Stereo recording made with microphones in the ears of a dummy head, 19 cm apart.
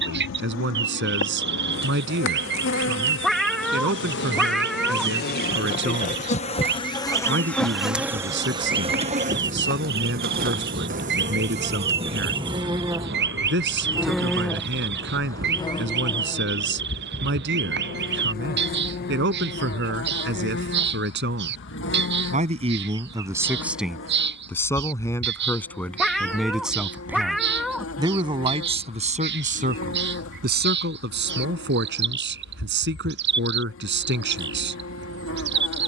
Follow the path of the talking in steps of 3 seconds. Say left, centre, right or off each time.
right, right, right, right, right, right, right, right, centre, right, right, right.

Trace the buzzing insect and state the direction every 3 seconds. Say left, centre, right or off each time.
left, left, centre, right, centre, left, left, left, left, left, left, left.